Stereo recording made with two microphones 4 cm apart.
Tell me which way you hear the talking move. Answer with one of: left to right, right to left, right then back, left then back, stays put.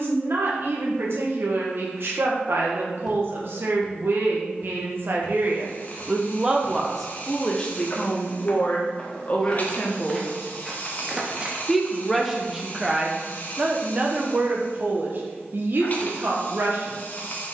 left then back.